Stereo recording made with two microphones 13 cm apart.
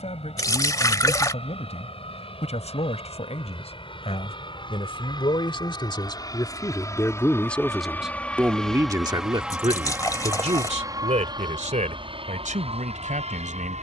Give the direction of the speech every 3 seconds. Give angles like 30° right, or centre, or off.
60° left, 50° left, 10° left, 60° right, 80° right.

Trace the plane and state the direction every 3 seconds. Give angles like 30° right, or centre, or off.
50° left, 40° left, 20° left, 20° right, 50° right.